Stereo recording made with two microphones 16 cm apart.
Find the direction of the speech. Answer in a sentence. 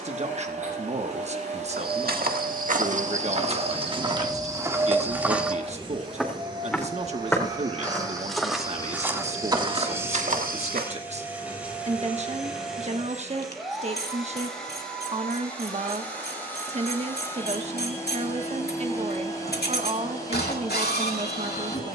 You can hear the speech on the right.